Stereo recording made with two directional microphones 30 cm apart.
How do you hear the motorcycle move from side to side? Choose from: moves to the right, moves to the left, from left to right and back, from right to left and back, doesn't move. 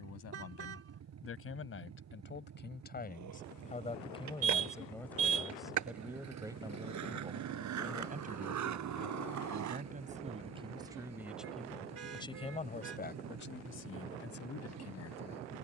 doesn't move.